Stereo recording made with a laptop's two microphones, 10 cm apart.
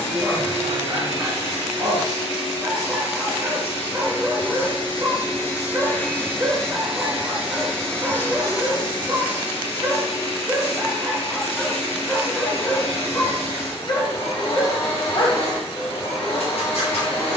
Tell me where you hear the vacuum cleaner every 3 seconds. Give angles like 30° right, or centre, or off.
70° left, 50° left, 10° left, 70° left, 70° left, 70° left.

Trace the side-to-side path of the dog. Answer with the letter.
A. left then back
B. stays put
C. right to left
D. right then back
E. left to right
C.